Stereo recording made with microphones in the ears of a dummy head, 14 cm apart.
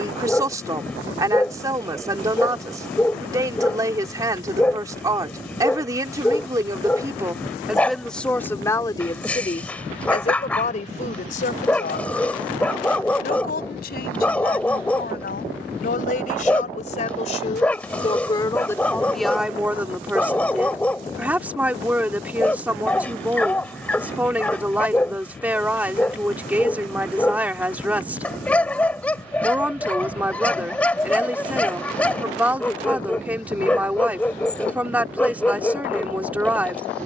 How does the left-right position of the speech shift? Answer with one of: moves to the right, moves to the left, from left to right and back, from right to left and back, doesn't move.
from right to left and back.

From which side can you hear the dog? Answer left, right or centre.
centre.